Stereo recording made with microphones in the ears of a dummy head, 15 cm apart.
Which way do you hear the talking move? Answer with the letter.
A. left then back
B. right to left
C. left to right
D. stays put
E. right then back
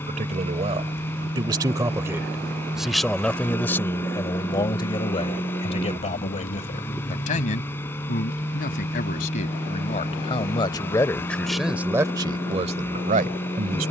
A.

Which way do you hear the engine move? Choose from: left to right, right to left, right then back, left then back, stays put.
stays put.